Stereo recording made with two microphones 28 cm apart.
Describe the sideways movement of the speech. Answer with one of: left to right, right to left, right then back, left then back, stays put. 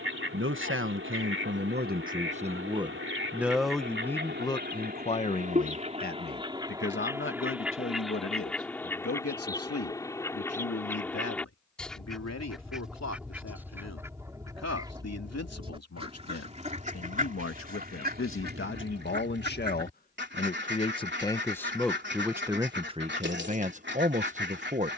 left then back.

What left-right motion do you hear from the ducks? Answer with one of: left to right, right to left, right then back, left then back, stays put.
left then back.